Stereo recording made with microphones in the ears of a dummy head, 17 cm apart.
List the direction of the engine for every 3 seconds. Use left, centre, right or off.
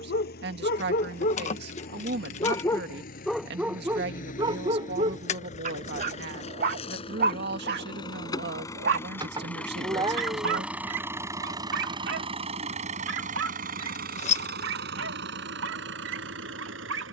left, left, left, centre, right, right.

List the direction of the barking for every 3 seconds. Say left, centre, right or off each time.
left, right, right, right, right, right.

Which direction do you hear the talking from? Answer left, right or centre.
right.